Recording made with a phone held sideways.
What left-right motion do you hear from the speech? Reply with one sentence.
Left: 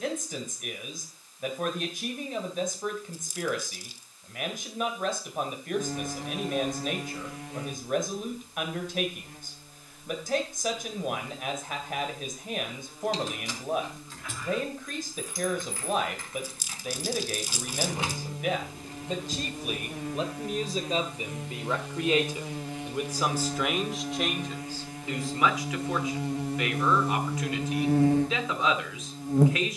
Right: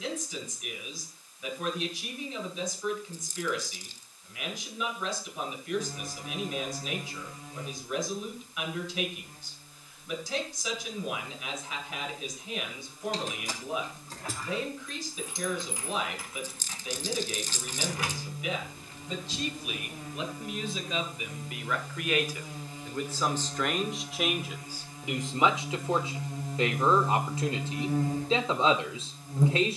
In this clip you hear the speech move to the right.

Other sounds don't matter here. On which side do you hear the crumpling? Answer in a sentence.
You can hear the crumpling in the centre.